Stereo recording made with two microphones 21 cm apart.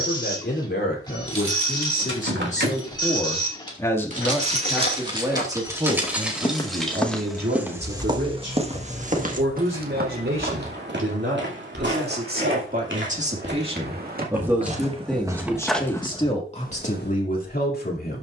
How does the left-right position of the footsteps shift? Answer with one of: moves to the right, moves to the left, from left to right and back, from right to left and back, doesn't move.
from left to right and back.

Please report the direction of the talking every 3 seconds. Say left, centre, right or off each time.
left, centre, right, right, right, left.